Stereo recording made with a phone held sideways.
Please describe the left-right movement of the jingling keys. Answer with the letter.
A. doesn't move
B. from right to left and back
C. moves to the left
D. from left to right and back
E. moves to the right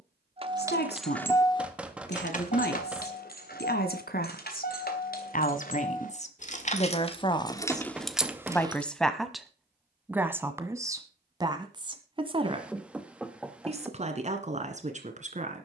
B.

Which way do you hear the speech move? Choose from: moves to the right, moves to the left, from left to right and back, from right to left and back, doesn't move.
moves to the right.